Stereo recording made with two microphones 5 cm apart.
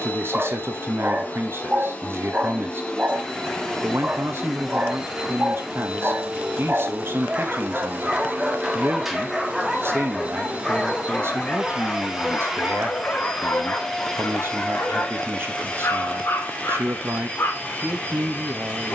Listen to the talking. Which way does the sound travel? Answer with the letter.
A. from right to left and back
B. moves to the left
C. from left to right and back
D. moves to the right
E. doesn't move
E.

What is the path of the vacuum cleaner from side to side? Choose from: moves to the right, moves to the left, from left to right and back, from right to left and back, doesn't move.
from left to right and back.